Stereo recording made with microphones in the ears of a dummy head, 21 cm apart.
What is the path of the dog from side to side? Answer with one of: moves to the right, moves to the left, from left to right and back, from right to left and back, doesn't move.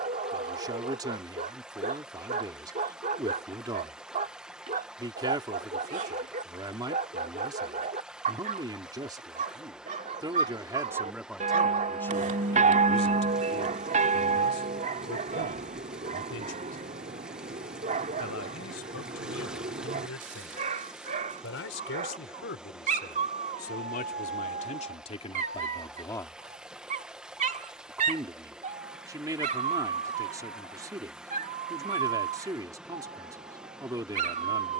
doesn't move.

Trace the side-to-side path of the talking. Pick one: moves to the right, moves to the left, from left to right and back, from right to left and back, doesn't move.
from right to left and back.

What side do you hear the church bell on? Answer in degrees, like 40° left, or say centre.
30° right.